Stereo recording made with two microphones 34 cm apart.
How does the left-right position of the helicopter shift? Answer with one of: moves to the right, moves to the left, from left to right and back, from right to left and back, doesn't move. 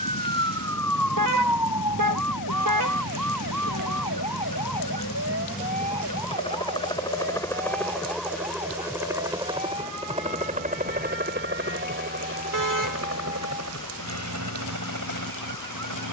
moves to the right.